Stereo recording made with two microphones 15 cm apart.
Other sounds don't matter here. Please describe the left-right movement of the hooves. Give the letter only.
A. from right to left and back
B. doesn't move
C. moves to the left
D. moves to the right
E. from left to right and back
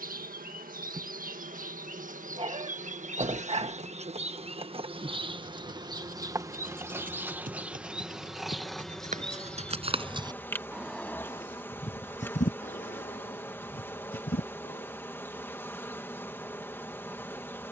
C.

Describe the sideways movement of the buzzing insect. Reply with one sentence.
In this clip you hear the buzzing insect move from right to left.